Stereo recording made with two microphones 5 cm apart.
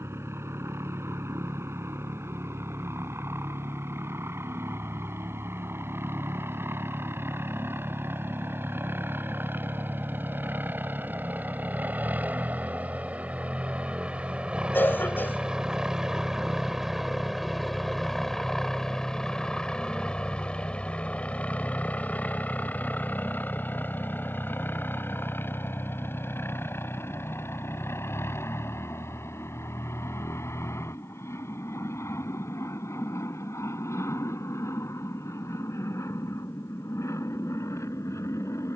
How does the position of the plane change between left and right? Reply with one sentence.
In this clip you hear the plane travel towards the left.